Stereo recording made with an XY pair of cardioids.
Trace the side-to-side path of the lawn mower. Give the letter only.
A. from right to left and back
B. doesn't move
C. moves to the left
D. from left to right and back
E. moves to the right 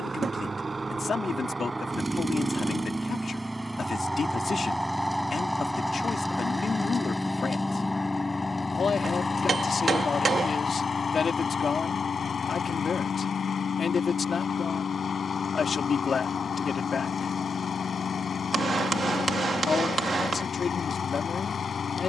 C.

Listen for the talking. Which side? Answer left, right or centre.
left.